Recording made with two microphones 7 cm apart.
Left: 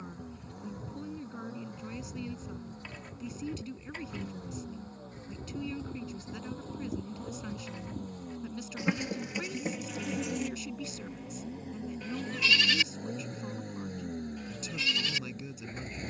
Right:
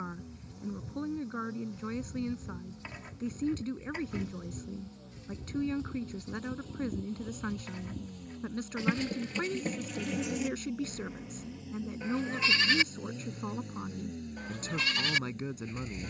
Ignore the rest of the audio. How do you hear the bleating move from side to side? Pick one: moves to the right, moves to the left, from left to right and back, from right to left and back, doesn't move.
moves to the right.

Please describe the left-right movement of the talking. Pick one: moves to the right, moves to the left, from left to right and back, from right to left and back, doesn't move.
doesn't move.